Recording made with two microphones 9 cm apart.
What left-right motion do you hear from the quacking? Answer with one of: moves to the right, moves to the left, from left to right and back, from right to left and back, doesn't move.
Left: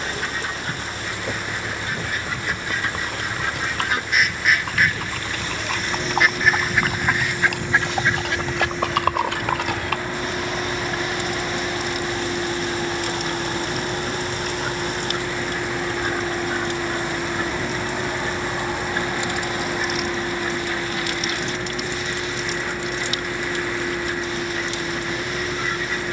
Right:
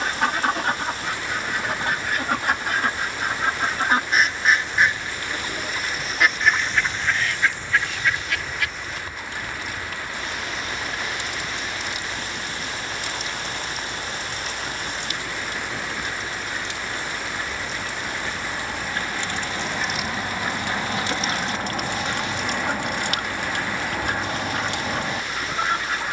from right to left and back.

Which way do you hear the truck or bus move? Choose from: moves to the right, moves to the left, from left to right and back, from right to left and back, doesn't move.
doesn't move.